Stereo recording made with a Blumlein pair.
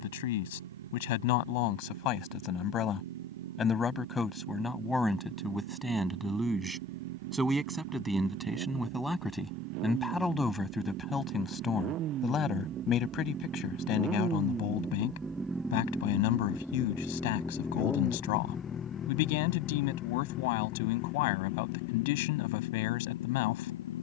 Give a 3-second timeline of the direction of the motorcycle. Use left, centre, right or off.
right, right, right, right, right, centre, left, left.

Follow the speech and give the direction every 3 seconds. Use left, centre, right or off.
left, centre, centre, centre, left, left, left, left.